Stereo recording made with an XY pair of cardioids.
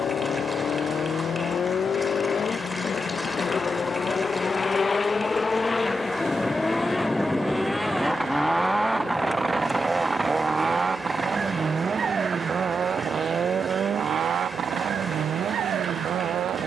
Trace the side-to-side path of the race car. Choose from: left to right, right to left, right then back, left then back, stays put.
left to right.